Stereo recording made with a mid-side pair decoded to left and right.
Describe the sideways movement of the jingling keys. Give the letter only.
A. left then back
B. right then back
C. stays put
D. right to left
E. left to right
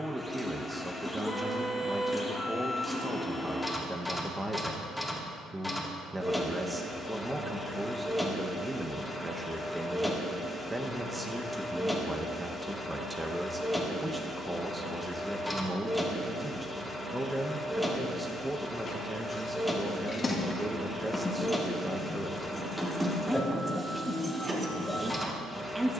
E.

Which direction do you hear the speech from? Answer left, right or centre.
centre.